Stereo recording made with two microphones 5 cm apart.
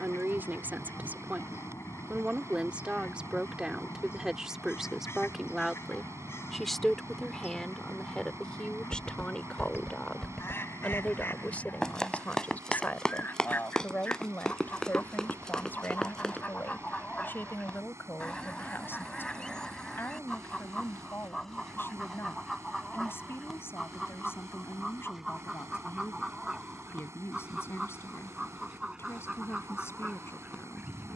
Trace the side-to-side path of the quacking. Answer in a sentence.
In this clip you hear the quacking go from the left side to the right.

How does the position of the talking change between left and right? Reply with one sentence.
In this clip you hear the talking travel towards the left.